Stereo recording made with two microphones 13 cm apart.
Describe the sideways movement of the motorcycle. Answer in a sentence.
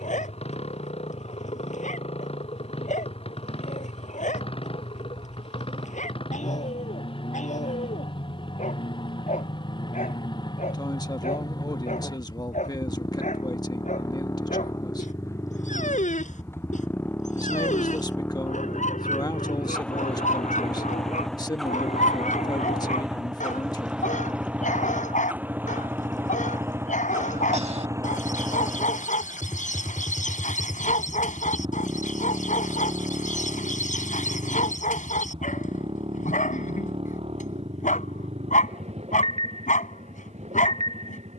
In this clip you hear the motorcycle go from the left side to the right.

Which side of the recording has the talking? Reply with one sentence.
In this clip you hear the talking on the left.